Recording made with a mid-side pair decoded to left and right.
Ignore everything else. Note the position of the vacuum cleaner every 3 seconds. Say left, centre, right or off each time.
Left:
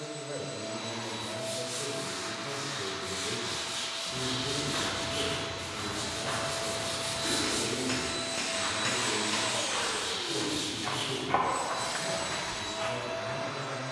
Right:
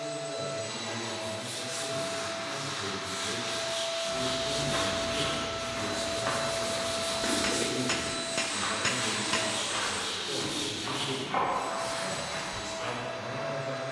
right, right, centre, left, left.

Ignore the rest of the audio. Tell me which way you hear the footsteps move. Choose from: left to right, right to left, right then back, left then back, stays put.
right to left.